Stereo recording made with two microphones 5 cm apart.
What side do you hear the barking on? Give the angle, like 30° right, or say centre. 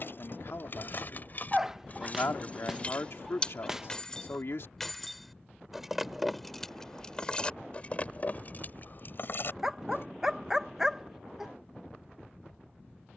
10° right.